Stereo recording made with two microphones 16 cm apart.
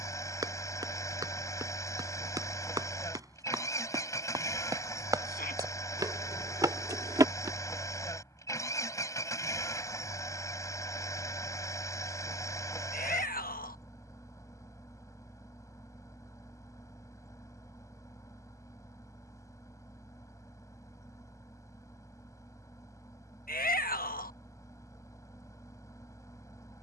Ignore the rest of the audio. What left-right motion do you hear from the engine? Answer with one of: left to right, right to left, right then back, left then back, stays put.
stays put.